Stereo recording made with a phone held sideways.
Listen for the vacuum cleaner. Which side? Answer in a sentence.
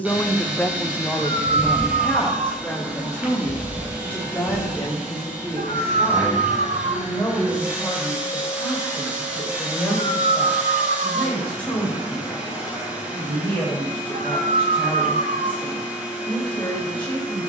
In this clip you hear the vacuum cleaner in the centre.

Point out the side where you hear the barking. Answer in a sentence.
In this clip you hear the barking on the right.